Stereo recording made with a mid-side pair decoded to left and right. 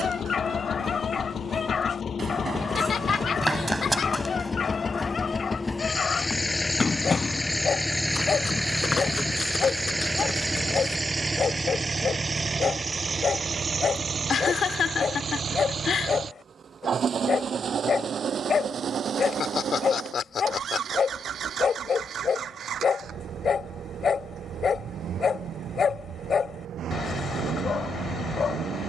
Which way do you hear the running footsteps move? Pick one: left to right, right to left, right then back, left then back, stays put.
right to left.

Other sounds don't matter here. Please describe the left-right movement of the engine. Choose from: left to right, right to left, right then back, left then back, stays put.
left to right.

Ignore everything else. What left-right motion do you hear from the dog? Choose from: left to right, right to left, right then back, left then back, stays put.
stays put.